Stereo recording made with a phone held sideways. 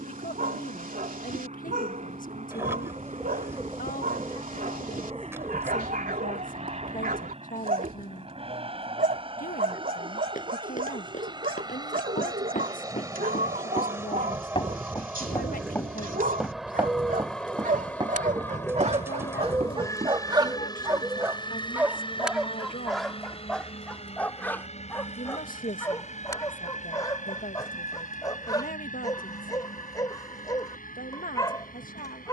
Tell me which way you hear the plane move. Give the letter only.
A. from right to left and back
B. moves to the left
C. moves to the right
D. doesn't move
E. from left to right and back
B.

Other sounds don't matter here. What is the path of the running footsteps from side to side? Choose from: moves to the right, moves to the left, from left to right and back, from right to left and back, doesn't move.
moves to the right.